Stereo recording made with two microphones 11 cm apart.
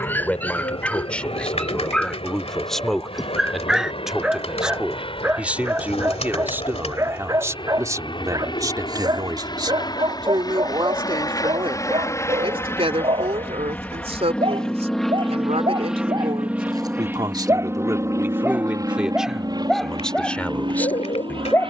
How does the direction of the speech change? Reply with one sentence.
You can hear the speech go right and come back.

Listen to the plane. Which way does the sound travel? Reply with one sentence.
In this clip you hear the plane travel towards the right.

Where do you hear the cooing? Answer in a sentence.
In this clip you hear the cooing on the left.